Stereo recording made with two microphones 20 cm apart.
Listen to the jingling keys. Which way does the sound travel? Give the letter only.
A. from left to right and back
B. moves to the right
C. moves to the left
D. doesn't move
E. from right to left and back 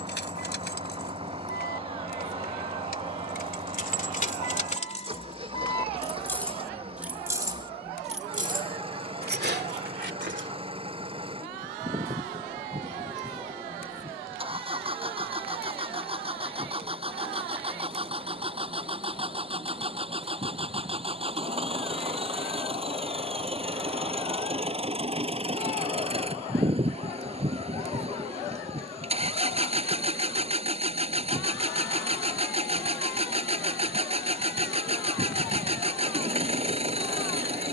B.